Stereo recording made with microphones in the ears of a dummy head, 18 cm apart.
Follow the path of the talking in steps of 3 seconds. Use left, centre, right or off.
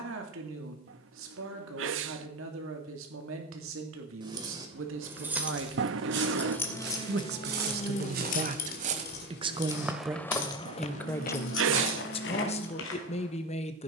right, right, right, centre, left.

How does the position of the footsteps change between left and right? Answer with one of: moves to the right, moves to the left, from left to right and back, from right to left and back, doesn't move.
moves to the left.